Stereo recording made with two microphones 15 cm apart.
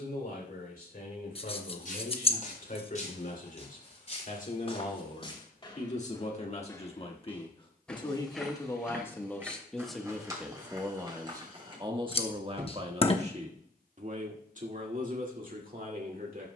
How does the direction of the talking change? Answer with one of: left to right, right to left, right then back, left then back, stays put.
left to right.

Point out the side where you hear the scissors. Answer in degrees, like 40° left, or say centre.
40° left.